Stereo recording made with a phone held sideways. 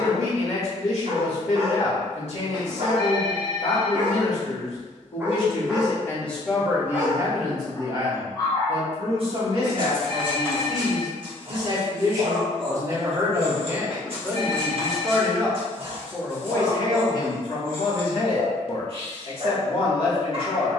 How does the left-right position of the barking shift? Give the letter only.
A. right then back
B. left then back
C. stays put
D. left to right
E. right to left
B.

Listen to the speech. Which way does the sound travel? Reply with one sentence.
You can hear the speech go right and come back.